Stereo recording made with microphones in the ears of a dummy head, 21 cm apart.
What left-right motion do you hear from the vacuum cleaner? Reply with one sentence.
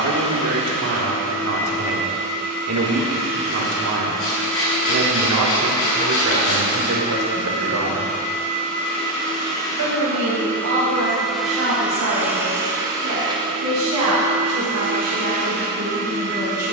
You can hear the vacuum cleaner go from the left side to the right.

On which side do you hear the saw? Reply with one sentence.
You can hear the saw on the left.